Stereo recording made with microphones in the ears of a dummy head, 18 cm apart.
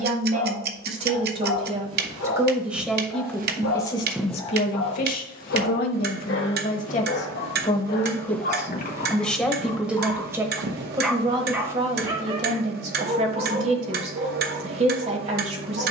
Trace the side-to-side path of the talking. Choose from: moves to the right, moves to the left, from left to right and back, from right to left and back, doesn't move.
from right to left and back.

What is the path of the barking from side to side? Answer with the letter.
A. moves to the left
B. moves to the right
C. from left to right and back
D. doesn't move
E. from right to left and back
B.